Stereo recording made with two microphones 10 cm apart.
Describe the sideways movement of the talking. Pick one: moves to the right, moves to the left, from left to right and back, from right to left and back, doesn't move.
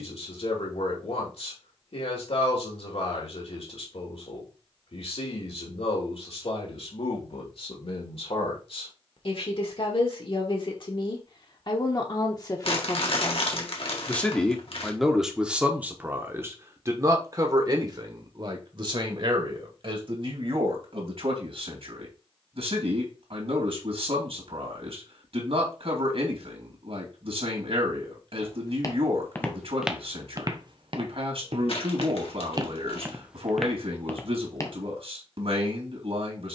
moves to the right.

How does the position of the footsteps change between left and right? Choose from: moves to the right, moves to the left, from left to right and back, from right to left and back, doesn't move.
from left to right and back.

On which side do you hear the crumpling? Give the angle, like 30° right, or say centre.
60° left.